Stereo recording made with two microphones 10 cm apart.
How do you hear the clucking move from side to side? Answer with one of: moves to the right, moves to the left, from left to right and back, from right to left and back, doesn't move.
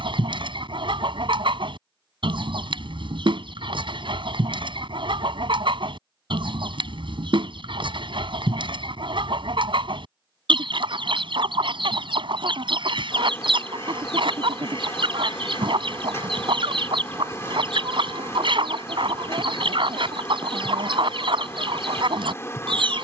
doesn't move.